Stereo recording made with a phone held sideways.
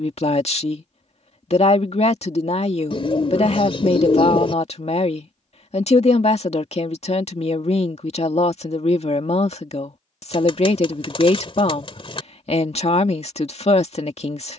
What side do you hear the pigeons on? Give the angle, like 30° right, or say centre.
40° left.